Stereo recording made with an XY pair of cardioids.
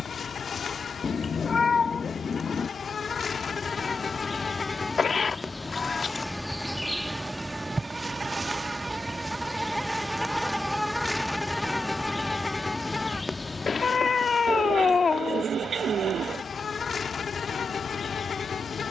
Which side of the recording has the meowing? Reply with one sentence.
In this clip you hear the meowing on the left.